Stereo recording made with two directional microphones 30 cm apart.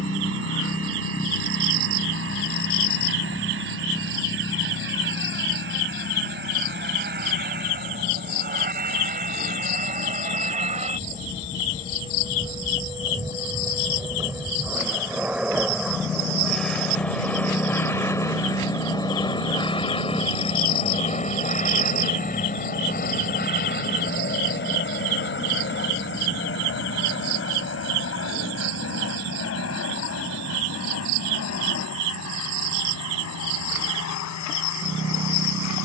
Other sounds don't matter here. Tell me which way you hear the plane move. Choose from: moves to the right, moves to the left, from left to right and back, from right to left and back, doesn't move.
moves to the left.